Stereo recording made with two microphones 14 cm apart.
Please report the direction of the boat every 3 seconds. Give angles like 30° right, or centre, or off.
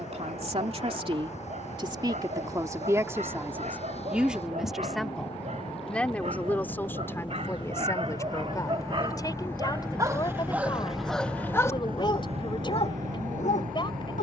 50° left, 50° left, 30° left, centre, 60° right.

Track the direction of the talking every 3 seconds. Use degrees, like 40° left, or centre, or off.
40° right, 10° right, 20° left, 30° left, 30° left.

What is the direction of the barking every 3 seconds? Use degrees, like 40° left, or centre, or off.
60° right, 60° right, 50° right, 10° right, 50° left.